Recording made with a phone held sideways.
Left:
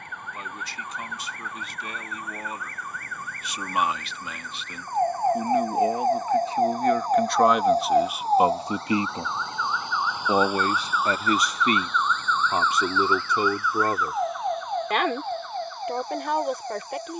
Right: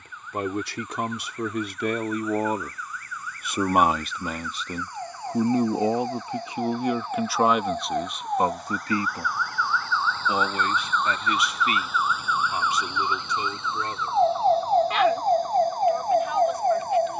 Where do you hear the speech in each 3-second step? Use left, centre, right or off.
right, right, centre, left, left, left.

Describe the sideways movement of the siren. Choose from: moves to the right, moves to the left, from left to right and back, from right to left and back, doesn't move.
moves to the right.